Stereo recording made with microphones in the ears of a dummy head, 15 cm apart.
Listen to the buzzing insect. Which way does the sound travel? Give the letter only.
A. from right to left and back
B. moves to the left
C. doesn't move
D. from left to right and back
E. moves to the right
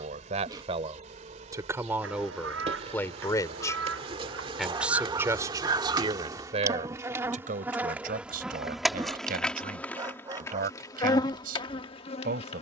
B.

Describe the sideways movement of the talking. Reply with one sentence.
You can hear the talking move from right to left and back again.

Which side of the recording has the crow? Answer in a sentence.
In this clip you hear the crow on the right.